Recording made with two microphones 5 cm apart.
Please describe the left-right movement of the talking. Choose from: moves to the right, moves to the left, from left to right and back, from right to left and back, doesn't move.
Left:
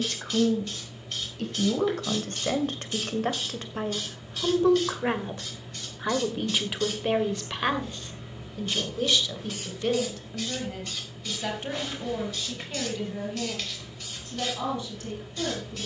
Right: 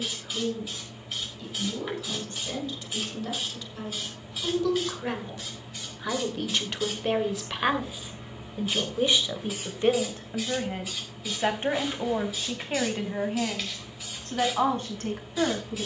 moves to the right.